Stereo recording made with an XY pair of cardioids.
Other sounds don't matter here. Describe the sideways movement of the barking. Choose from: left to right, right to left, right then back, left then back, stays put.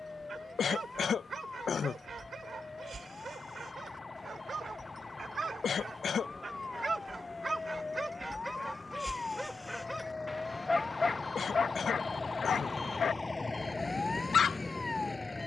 right to left.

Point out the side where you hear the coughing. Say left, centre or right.
left.